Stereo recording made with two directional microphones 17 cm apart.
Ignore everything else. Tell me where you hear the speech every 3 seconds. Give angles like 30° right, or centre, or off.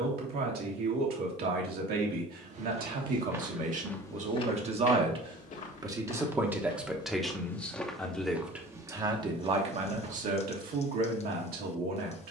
60° right, 40° right, centre, 50° right.